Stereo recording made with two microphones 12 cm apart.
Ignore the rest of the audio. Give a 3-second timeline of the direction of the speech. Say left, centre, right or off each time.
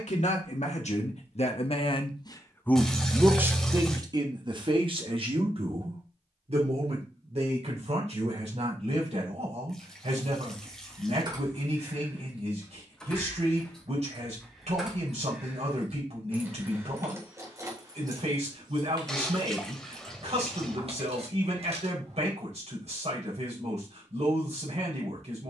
left, right, right, right, right, right, right, right, right.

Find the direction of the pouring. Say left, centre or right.
centre.